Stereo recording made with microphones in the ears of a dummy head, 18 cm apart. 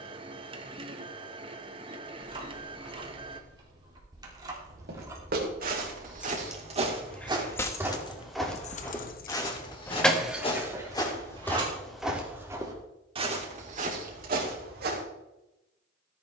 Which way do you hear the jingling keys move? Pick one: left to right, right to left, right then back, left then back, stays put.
left then back.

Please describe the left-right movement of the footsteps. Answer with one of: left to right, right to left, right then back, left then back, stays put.
left then back.